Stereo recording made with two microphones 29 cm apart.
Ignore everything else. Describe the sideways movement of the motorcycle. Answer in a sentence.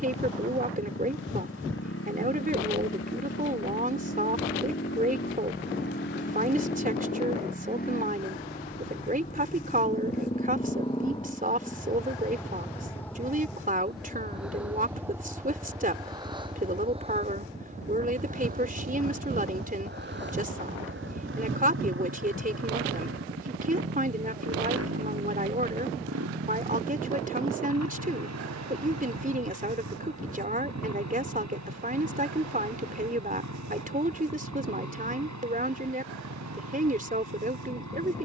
In this clip you hear the motorcycle travel towards the right.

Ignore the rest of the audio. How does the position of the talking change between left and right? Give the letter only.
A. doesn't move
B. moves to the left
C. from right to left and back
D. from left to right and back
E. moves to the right
A.